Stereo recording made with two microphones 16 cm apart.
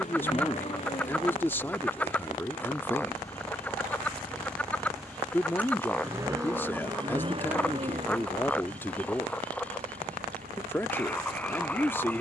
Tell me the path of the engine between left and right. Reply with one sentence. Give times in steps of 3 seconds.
In this clip you hear the engine on the left from 0 s, in the centre from 3 s and on the right from 6 s.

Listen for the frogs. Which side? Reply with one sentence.
In this clip you hear the frogs in the centre.